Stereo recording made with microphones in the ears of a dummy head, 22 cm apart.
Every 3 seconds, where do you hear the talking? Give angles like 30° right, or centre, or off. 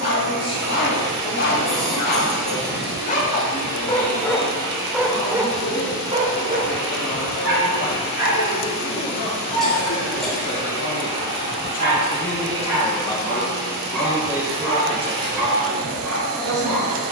70° left, 70° left, 70° left, 50° left, 10° left, 40° right.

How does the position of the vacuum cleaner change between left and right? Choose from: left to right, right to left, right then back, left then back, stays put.
stays put.